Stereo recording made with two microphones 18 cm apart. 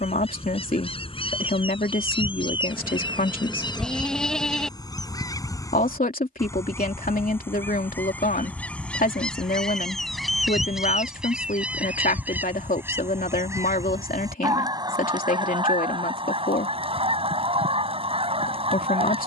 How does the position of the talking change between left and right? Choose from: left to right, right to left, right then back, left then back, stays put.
stays put.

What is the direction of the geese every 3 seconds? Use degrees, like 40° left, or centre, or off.
30° left, 20° left, 10° left, centre, 20° right, 30° right, 30° right.